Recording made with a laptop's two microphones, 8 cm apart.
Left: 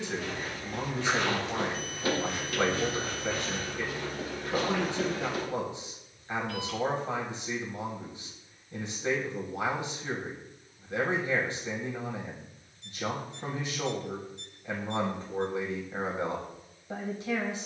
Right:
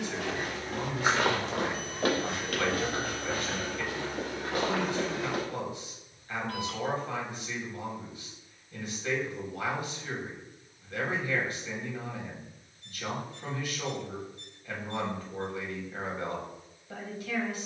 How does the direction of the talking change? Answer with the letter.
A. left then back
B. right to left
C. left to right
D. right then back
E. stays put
E.